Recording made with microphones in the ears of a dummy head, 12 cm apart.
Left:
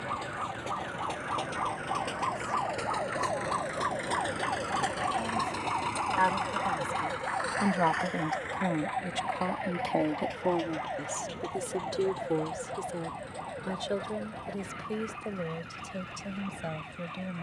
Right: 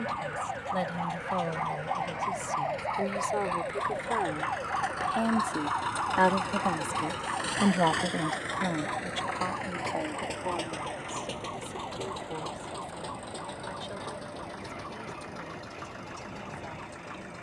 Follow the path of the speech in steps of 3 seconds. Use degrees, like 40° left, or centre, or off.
80° right, 60° right, 20° right, 40° left, 60° left, 70° left.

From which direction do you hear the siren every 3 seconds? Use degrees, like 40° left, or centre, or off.
30° right, centre, 30° left, 40° left, 50° left, 60° left.